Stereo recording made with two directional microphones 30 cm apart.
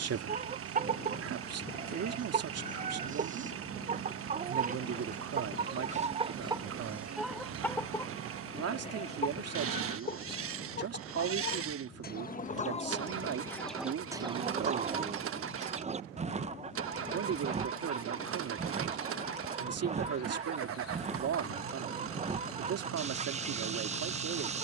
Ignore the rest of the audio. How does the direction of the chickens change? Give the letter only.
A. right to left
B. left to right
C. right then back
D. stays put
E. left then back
E.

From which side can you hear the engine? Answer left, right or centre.
right.